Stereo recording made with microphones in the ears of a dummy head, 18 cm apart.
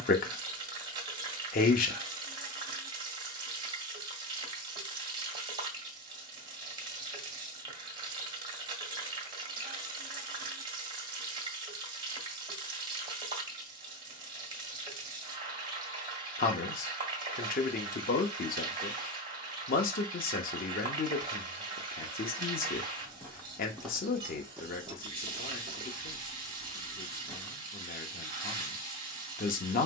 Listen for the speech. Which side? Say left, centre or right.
left.